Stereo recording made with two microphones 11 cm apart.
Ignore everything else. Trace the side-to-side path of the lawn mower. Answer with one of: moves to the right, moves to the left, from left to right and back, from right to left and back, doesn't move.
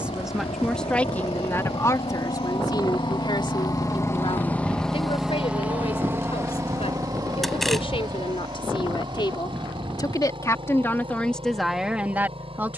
moves to the right.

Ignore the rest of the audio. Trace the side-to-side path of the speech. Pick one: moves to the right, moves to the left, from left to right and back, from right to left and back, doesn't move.
from right to left and back.